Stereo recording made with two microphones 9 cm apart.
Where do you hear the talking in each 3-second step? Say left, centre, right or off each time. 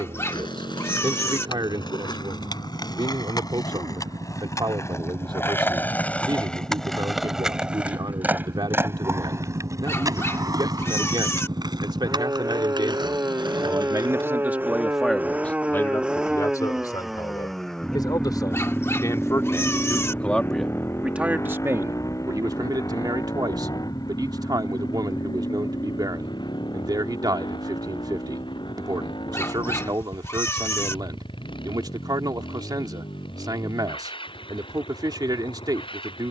right, right, right, right, right, left, left, right, right, right, right, right.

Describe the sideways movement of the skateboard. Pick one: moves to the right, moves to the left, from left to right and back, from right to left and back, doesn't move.
moves to the right.